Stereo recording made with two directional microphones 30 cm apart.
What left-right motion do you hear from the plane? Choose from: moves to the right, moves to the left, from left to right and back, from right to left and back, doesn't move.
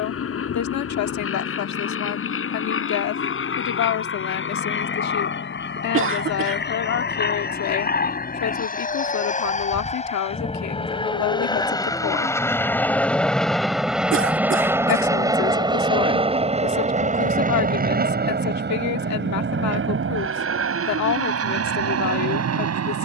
moves to the right.